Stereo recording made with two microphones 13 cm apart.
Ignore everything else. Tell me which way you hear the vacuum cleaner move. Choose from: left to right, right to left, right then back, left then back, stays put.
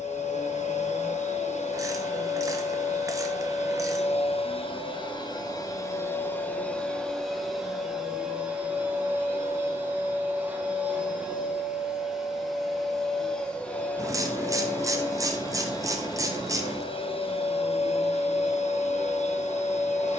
right then back.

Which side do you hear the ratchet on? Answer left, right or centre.
right.